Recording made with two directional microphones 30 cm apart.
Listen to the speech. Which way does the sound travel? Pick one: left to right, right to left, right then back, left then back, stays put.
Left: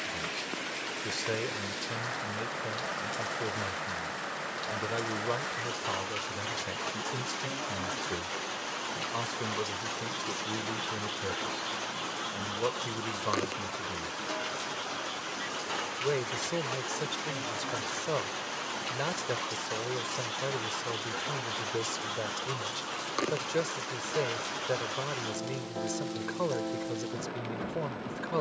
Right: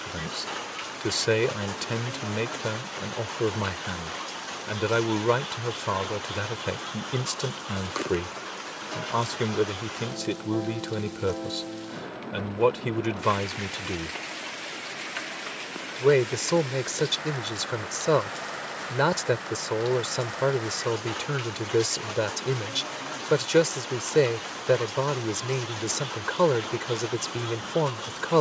stays put.